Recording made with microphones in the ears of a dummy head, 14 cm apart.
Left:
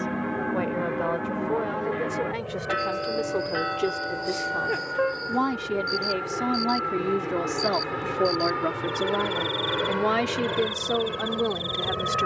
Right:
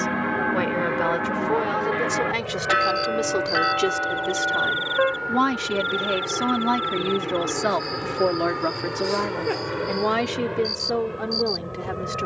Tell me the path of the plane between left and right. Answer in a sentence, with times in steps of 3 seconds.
You can hear the plane on the right from 0 s, in the centre from 6 s and on the left from 9 s.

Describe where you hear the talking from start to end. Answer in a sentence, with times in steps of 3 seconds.
In this clip you hear the talking on the right from 0 s and in the centre from 9 s.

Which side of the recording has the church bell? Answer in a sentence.
In this clip you hear the church bell on the right.